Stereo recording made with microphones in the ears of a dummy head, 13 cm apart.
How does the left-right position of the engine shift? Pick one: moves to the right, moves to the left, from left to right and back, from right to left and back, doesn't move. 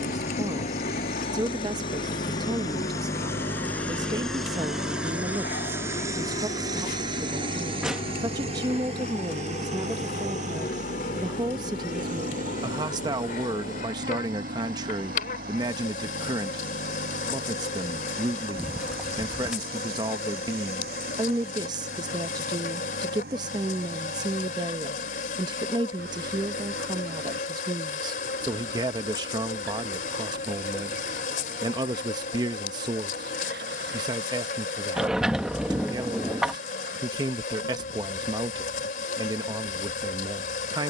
moves to the right.